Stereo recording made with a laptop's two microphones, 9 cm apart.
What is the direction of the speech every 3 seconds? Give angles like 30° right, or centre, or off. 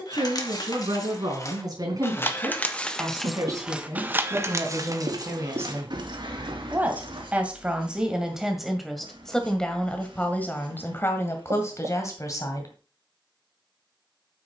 50° right, 40° right, 10° right, 20° left, 40° left.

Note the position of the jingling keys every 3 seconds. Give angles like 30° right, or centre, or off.
40° left, 30° right, 60° right, off, off.